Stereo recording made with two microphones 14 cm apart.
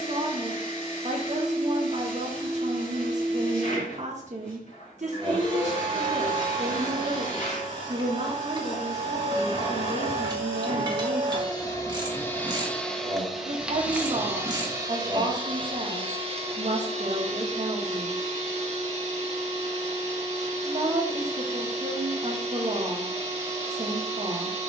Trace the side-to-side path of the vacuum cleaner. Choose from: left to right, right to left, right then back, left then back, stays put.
left to right.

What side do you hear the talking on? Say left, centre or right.
right.